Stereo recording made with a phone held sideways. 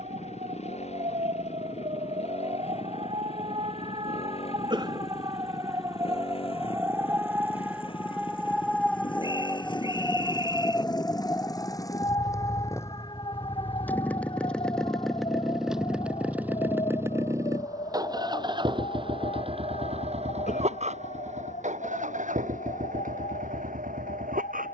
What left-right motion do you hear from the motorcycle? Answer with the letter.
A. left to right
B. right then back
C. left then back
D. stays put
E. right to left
A.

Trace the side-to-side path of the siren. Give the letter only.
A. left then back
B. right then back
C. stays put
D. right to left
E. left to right
D.